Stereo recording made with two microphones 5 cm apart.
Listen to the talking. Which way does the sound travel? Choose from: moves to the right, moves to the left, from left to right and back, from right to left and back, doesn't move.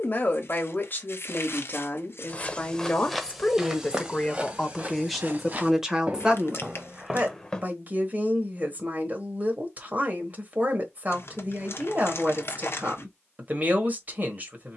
moves to the right.